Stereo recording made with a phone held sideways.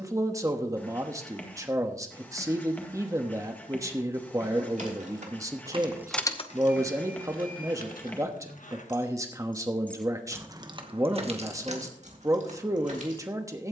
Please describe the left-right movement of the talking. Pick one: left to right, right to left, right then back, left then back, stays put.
stays put.